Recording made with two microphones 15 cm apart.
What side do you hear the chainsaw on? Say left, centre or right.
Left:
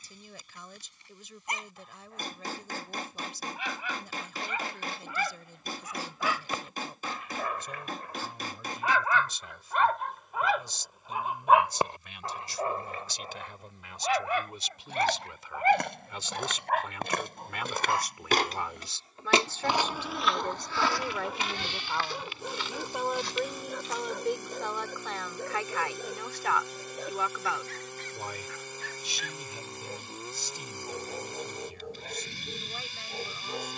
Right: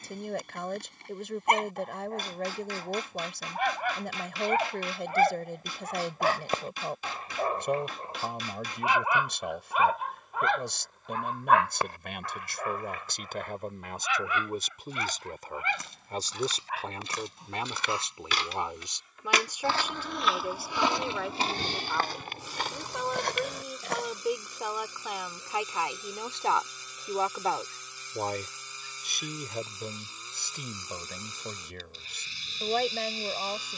left.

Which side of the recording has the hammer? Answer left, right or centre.
left.